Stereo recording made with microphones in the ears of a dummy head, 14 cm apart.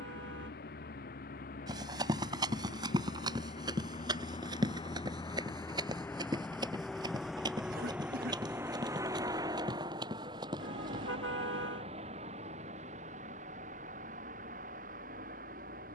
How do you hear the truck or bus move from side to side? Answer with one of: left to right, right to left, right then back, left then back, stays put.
left to right.